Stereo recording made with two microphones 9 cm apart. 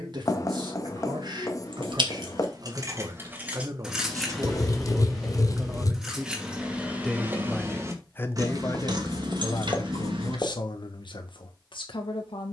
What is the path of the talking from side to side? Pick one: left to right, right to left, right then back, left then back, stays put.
right to left.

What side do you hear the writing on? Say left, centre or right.
left.